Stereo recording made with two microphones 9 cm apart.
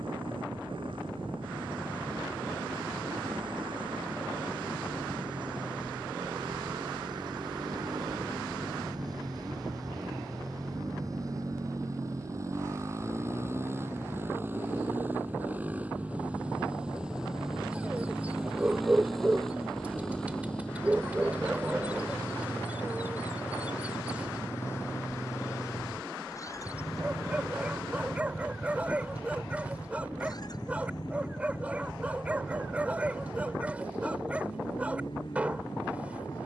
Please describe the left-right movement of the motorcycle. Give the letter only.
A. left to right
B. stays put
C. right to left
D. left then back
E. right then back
C.